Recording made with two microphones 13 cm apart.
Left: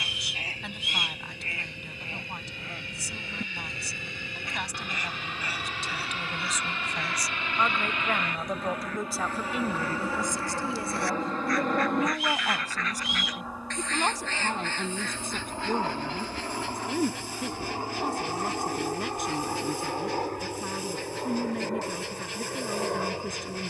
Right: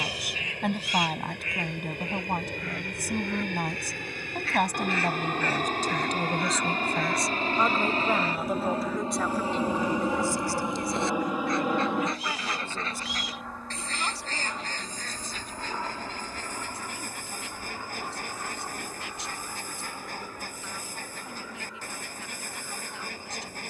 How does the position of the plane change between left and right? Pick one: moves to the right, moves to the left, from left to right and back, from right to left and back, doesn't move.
moves to the left.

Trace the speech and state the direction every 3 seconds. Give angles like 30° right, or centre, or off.
60° right, 50° right, 20° right, 20° left, 40° left, 50° left, 60° left, 60° left.